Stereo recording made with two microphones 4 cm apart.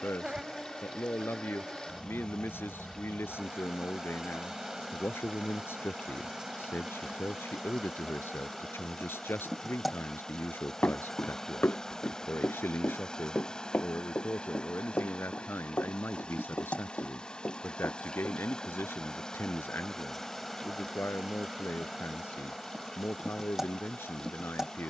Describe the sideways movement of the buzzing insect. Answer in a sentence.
You can hear the buzzing insect go left and come back.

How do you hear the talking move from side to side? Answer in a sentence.
In this clip you hear the talking stay put.